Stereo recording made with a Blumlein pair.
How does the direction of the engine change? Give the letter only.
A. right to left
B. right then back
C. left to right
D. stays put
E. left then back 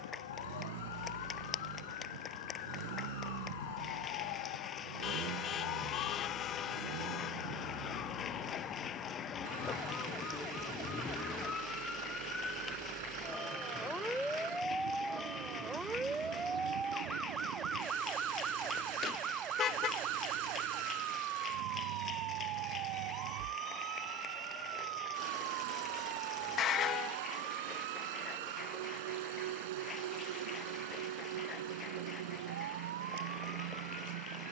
D.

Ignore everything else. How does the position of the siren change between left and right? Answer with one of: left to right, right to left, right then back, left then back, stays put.
left to right.